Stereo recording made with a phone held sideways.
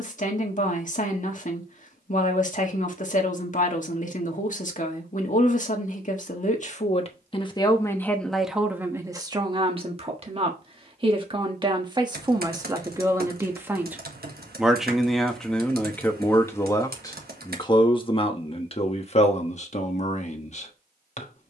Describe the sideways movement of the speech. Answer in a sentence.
You can hear the speech move from left to right and back again.